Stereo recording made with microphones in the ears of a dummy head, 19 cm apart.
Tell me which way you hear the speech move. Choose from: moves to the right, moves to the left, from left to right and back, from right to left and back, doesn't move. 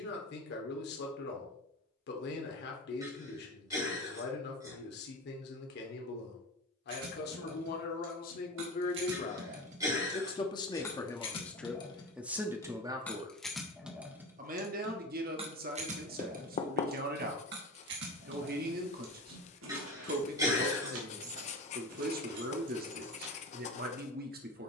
moves to the right.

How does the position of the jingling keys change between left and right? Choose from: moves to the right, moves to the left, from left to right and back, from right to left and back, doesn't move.
from right to left and back.